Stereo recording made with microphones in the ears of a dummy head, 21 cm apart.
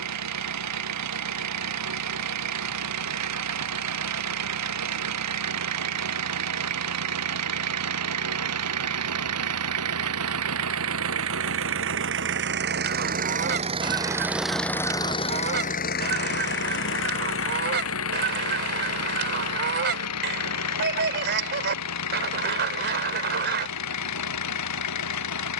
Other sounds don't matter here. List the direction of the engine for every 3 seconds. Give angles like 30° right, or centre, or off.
80° right, 80° right, 80° right, 70° right, 30° right, 50° left, 70° left, 80° left, 80° left.